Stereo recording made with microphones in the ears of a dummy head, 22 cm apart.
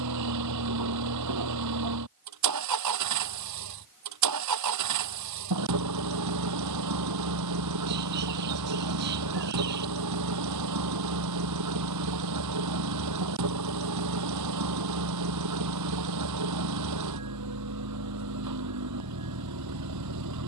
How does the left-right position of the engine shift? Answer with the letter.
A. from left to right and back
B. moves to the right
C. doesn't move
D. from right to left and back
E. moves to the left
C.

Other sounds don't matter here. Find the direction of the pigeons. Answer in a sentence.
You can hear the pigeons on the right.